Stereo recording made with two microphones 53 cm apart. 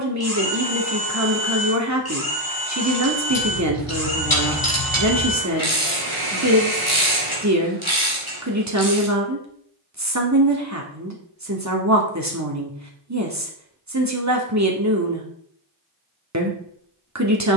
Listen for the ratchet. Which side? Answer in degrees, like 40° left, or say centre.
60° left.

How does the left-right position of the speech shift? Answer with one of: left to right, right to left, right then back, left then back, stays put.
stays put.